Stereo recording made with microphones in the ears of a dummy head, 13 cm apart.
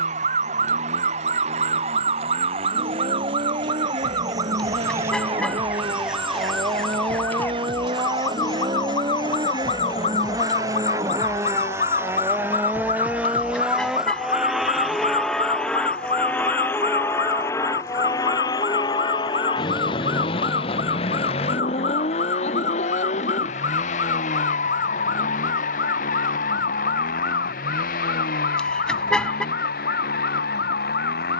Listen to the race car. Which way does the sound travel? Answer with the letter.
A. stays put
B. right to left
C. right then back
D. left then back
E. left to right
B.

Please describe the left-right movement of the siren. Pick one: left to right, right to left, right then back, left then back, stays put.
right to left.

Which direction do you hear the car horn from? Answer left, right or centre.
centre.